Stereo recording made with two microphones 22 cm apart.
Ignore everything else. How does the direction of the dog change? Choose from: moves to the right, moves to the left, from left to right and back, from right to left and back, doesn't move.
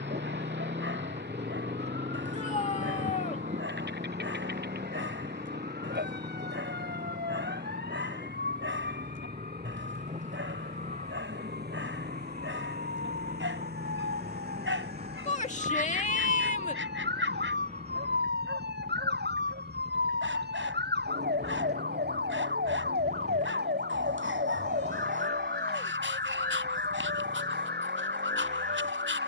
doesn't move.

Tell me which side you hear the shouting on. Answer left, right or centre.
left.